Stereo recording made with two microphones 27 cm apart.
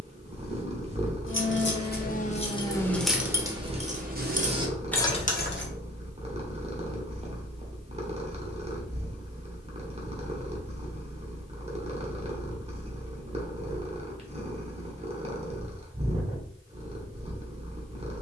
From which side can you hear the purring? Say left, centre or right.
right.